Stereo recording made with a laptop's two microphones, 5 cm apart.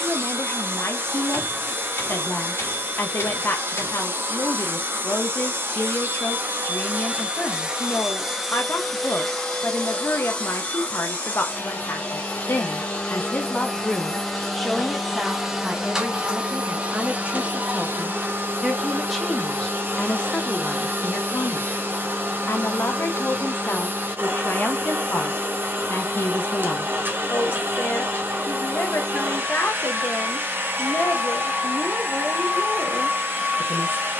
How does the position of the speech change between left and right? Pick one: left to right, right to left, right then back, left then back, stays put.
right then back.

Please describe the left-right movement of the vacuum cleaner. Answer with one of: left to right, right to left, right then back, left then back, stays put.
left then back.